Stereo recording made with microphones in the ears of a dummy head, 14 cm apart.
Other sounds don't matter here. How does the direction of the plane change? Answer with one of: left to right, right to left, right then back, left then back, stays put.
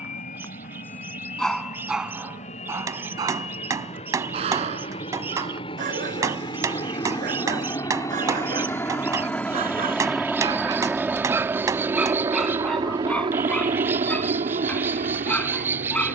left to right.